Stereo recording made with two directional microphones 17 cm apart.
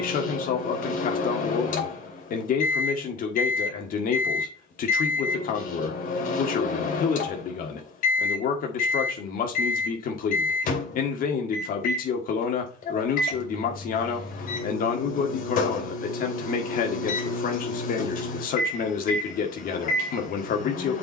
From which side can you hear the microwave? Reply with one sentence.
You can hear the microwave on the left.